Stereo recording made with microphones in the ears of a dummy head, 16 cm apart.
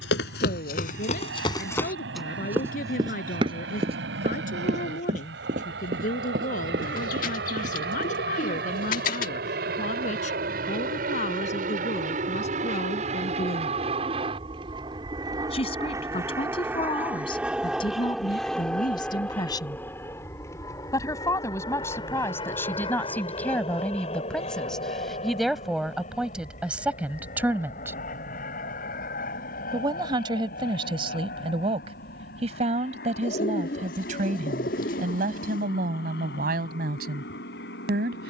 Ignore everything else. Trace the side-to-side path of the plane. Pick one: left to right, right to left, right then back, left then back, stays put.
right to left.